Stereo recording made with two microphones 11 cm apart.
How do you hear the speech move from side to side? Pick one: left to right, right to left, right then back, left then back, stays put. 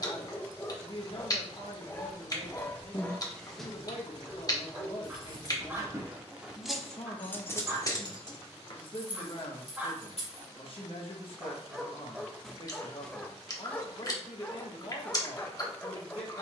stays put.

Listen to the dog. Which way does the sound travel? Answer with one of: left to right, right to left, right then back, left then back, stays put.
right then back.